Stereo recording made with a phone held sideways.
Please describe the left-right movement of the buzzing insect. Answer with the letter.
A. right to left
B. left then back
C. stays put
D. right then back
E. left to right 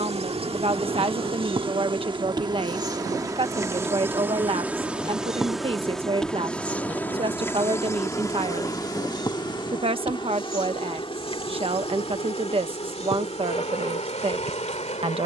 A.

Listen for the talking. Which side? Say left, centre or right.
right.